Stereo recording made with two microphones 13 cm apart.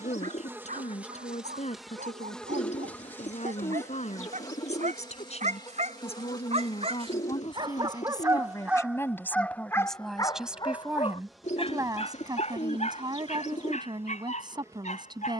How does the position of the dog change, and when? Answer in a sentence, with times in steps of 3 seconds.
You can hear the dog on the right from 0 s and on the left from 9 s.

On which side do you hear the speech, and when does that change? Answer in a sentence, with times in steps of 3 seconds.
You can hear the speech on the left from 0 s, in the centre from 9 s and on the right from 12 s.